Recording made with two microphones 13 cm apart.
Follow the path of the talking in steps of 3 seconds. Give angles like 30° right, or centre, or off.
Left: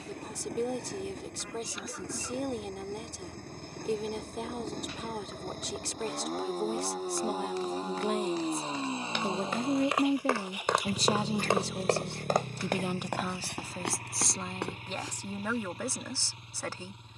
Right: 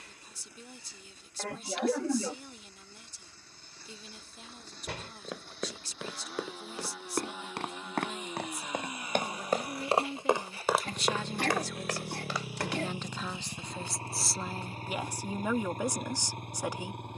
70° left, 70° left, 60° left, 40° left, 10° left, 20° right.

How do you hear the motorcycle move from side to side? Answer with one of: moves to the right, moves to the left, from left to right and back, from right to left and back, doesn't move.
moves to the right.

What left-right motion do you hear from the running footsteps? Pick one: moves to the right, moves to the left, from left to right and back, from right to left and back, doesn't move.
moves to the left.